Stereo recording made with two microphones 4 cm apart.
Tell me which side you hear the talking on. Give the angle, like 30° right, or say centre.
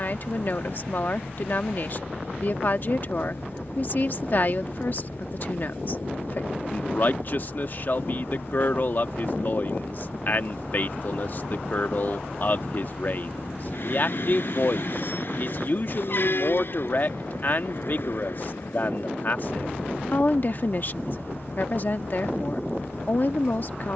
50° left.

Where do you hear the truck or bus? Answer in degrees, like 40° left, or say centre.
60° left.